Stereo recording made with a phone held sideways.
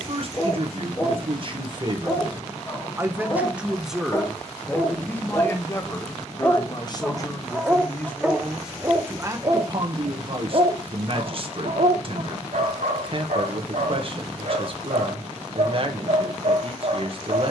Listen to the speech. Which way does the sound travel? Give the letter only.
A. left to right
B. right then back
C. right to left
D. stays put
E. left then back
E.